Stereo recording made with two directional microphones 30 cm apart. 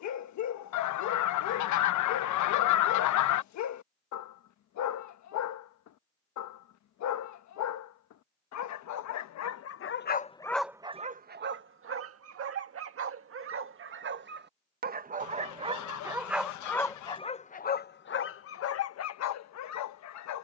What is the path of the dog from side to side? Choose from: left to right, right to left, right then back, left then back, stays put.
right then back.